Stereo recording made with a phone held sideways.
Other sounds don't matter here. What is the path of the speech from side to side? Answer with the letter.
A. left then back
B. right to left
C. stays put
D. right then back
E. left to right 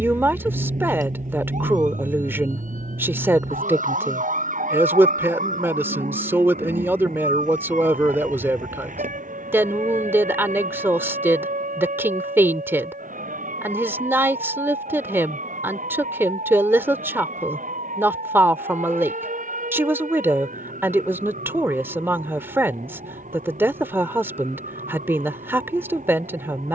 C.